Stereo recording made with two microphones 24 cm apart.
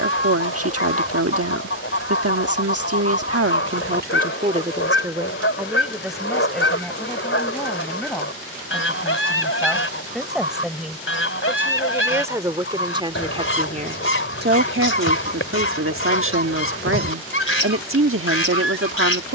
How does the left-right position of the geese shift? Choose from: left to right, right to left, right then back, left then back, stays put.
stays put.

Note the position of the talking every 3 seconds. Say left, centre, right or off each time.
right, right, centre, centre, right, right, right.